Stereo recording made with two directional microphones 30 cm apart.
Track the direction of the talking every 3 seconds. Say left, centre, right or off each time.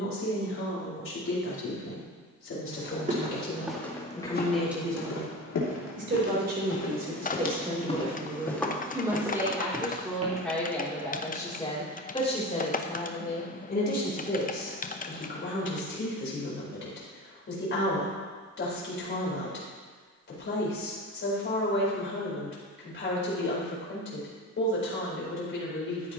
left, centre, right, centre, left, left, left, left, left.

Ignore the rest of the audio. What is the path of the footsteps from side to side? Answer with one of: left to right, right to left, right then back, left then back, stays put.
left then back.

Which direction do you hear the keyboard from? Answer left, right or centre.
left.